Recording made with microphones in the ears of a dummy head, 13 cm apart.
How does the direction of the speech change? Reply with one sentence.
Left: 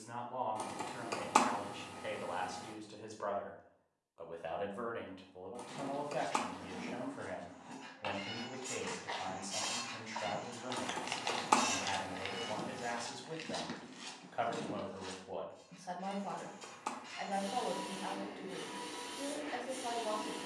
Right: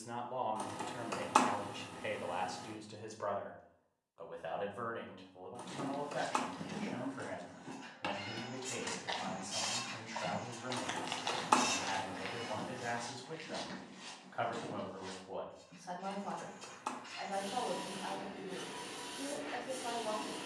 In this clip you hear the speech move from right to left.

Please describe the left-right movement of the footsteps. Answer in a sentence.
In this clip you hear the footsteps move to the left.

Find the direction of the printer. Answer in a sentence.
In this clip you hear the printer in the centre.